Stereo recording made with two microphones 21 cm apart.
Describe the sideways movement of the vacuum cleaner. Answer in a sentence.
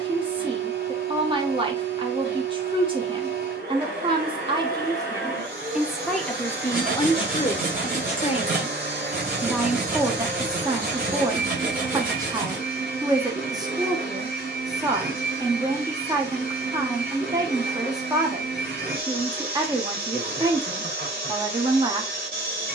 In this clip you hear the vacuum cleaner stay put.